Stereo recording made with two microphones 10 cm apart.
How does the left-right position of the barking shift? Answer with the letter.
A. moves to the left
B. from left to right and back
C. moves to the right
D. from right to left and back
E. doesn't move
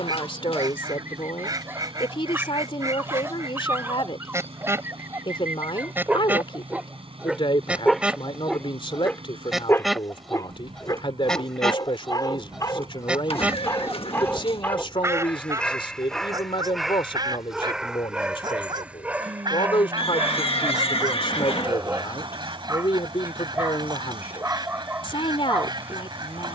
D.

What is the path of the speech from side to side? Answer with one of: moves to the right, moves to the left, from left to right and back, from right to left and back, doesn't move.
doesn't move.